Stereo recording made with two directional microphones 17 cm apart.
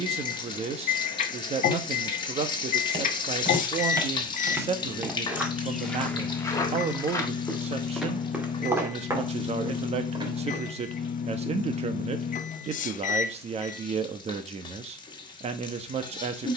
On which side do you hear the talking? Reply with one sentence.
You can hear the talking on the right.